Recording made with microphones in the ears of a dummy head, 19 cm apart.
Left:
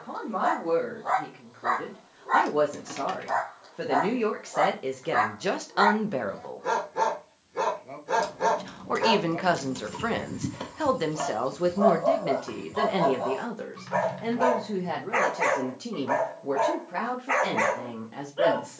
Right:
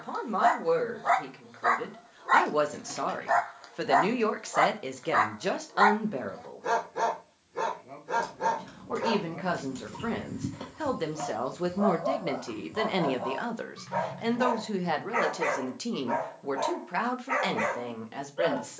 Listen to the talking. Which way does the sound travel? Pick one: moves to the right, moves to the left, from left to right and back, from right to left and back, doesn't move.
from right to left and back.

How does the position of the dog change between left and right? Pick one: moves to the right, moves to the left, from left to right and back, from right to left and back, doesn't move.
moves to the left.